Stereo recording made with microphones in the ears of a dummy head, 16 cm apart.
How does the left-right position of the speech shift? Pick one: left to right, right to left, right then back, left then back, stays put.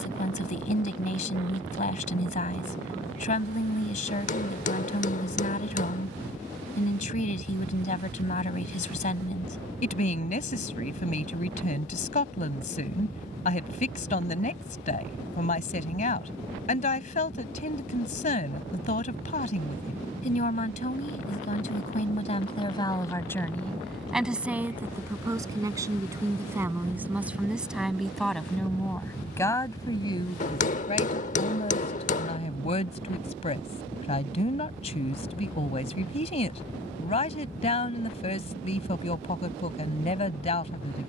right then back.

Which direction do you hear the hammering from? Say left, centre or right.
left.